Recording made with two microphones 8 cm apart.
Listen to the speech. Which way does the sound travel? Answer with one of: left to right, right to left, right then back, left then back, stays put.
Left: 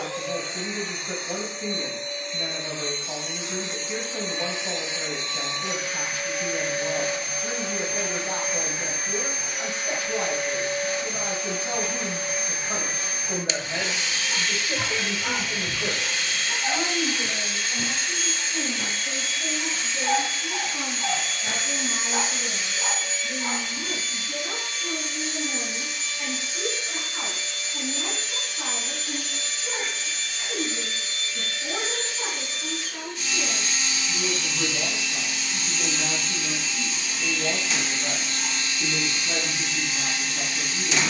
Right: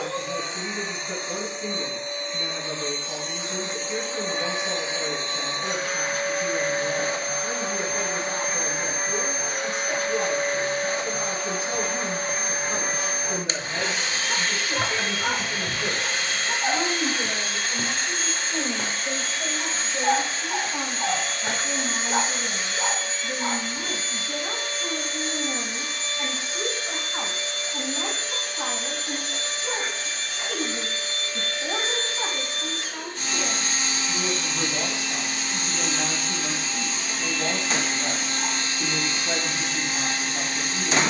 left to right.